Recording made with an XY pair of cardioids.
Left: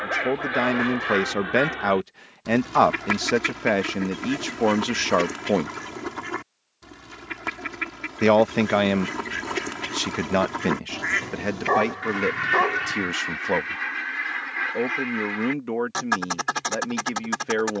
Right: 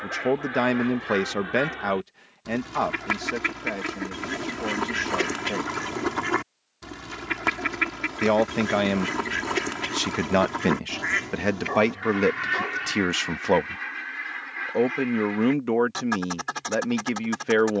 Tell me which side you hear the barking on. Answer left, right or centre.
left.